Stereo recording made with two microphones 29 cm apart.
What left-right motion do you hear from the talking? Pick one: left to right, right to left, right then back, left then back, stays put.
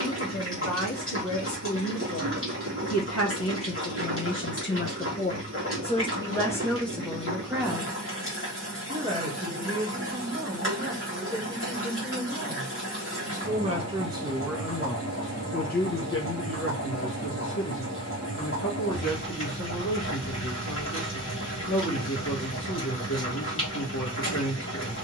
right then back.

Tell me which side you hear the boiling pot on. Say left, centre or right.
left.